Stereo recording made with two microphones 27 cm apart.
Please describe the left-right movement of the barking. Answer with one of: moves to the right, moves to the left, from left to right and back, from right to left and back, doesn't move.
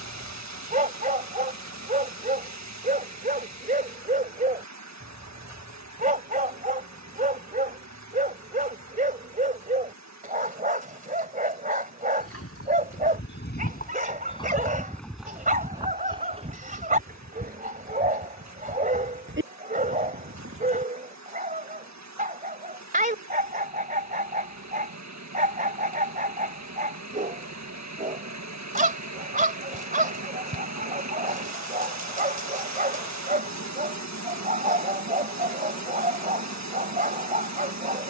doesn't move.